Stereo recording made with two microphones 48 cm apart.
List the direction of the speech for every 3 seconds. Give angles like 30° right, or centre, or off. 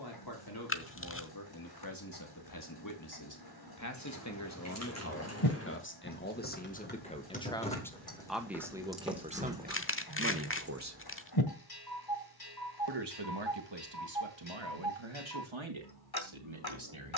50° left, 30° left, 10° left, 20° right, 60° right, 70° right.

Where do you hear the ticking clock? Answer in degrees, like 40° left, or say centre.
50° left.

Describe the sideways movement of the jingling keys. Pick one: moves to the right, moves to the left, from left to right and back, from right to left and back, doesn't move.
moves to the right.